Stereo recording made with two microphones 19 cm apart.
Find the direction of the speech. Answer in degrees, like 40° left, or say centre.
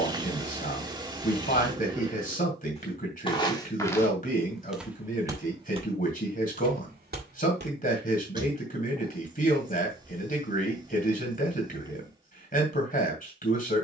50° left.